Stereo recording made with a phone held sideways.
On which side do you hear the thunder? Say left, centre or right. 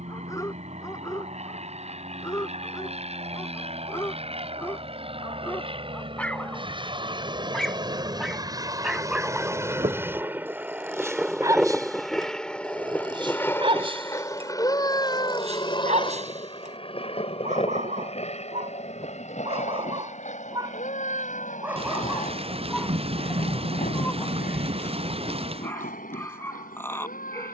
right.